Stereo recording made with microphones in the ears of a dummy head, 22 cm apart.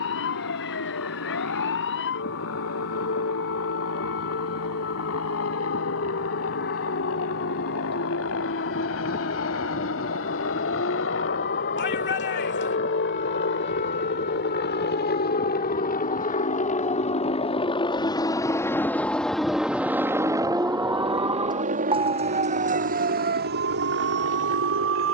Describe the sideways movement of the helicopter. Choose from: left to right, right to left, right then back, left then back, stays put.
left to right.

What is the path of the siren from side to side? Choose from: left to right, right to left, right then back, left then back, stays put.
left to right.